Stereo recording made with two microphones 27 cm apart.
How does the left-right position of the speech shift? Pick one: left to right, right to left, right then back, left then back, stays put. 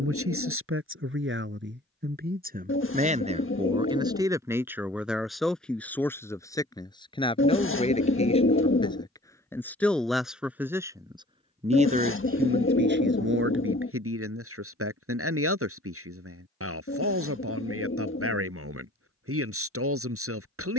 left then back.